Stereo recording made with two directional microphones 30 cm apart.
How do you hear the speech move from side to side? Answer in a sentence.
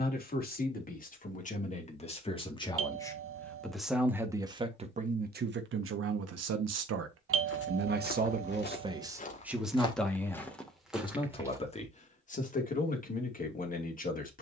In this clip you hear the speech move from left to right and back again.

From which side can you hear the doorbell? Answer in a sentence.
You can hear the doorbell on the right.